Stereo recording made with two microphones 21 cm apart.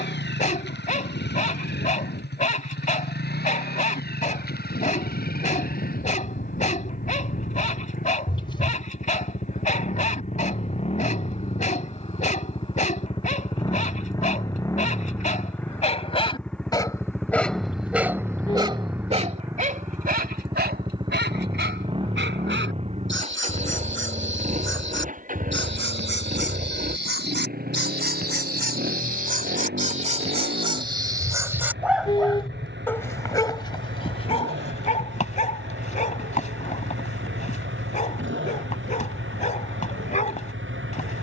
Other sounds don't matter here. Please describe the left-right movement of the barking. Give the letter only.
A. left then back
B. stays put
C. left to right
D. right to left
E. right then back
E.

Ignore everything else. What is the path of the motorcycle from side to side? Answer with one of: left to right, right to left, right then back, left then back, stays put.
left to right.